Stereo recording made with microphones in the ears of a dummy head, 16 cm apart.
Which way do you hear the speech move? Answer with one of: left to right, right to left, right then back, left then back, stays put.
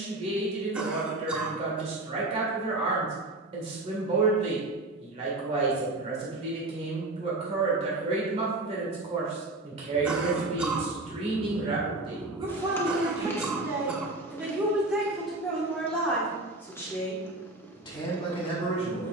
right to left.